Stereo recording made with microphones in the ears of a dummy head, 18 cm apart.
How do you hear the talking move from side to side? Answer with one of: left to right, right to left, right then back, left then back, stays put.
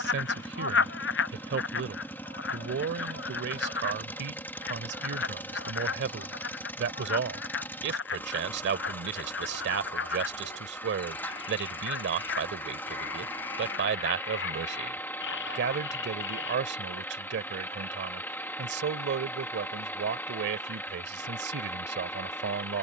stays put.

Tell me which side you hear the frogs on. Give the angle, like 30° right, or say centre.
60° left.